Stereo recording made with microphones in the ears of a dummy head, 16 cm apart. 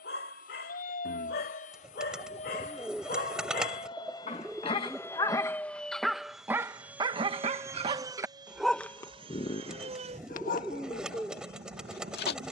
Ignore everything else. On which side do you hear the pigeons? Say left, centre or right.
centre.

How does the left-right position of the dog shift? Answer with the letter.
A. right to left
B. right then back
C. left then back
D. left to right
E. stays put
B.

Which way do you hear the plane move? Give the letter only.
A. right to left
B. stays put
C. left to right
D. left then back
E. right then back
C.